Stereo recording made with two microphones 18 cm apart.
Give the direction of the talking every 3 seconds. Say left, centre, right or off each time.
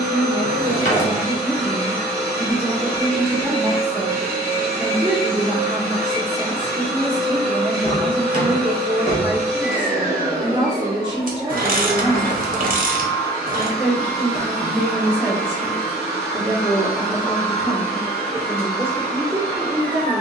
right, right, right, right, centre, centre, right.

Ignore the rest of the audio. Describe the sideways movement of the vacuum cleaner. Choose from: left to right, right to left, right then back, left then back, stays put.
stays put.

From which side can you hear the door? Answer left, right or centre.
left.